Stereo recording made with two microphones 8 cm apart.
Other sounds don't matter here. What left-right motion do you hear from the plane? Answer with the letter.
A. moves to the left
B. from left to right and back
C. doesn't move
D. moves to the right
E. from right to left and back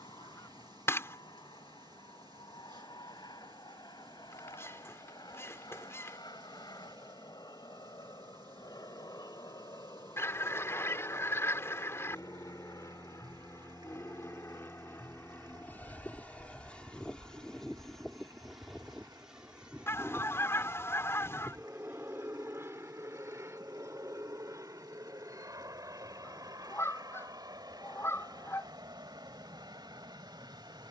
D.